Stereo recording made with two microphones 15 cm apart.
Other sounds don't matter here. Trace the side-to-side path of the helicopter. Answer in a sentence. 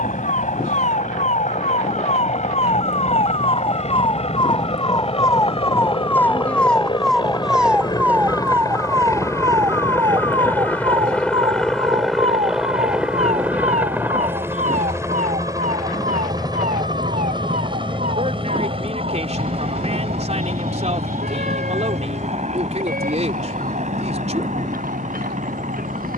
In this clip you hear the helicopter go from the left side to the right.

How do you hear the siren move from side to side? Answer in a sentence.
In this clip you hear the siren move from left to right.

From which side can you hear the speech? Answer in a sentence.
In this clip you hear the speech on the right.